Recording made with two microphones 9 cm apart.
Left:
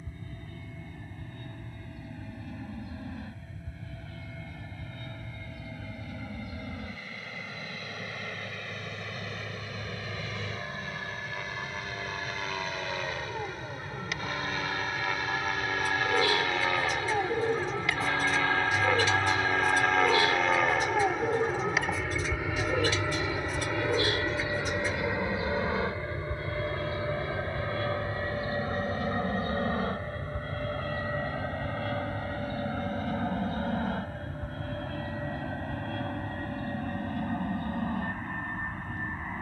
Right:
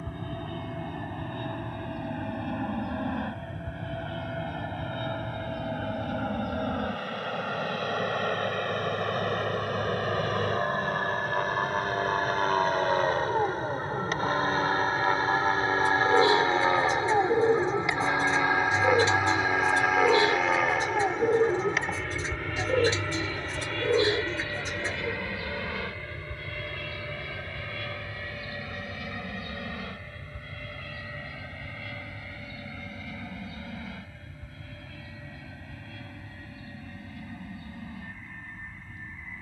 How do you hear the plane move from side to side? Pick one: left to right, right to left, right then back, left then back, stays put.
right to left.